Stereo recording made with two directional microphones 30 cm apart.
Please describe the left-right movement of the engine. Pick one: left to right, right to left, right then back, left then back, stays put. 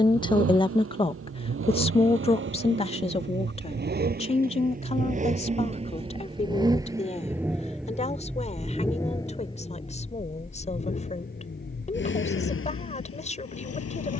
right to left.